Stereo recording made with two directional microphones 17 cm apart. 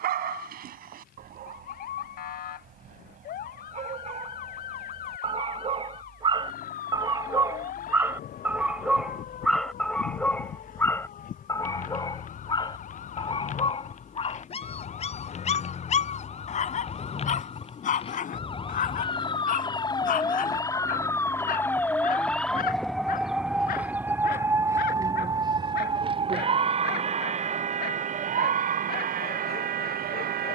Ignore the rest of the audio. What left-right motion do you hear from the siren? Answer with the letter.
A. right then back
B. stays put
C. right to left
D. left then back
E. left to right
E.